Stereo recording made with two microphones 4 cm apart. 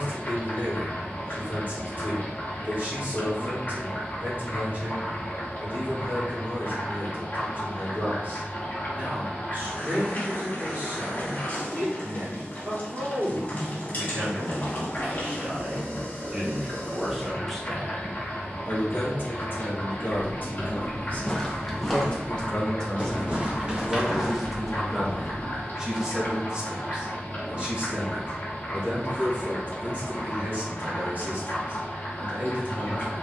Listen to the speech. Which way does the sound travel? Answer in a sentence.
You can hear the speech go left and come back.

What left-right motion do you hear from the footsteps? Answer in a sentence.
You can hear the footsteps go right and come back.